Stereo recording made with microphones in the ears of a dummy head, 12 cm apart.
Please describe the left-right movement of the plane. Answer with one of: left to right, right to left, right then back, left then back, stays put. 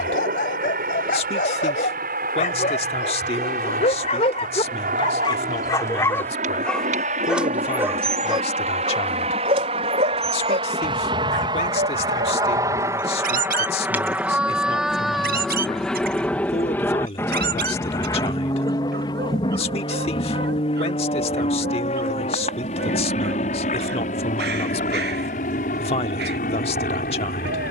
right to left.